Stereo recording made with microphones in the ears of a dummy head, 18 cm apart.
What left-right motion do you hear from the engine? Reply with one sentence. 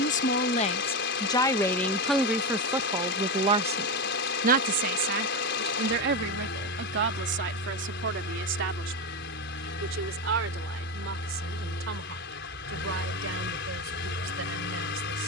In this clip you hear the engine stay in one place.